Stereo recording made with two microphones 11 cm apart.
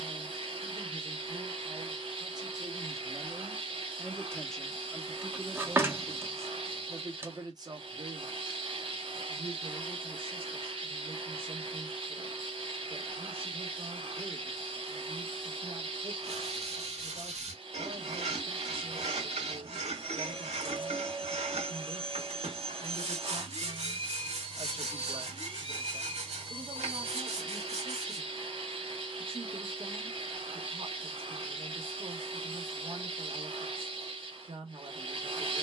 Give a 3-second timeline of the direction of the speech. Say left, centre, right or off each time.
right, centre, right, right, right, right, right, right, right, right, right, right.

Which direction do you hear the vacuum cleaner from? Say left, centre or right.
right.